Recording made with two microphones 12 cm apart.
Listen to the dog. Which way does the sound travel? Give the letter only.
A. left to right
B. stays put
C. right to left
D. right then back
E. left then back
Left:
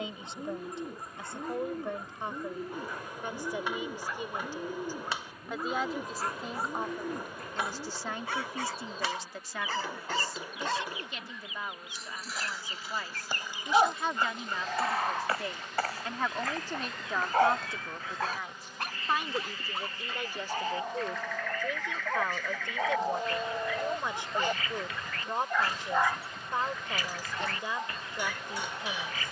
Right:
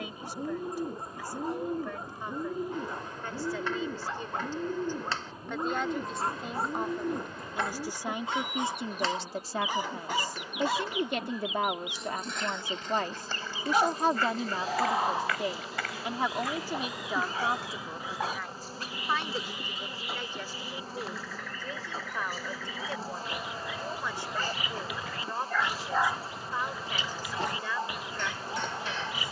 E.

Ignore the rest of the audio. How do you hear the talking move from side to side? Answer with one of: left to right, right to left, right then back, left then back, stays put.
right then back.